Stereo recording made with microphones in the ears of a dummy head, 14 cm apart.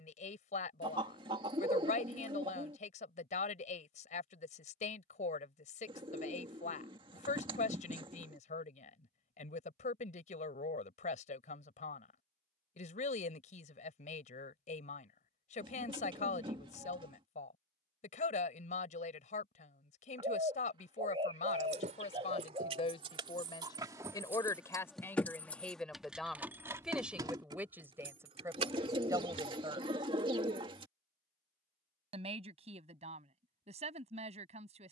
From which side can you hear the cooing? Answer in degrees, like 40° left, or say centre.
30° right.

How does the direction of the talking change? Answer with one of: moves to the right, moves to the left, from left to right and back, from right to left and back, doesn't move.
moves to the right.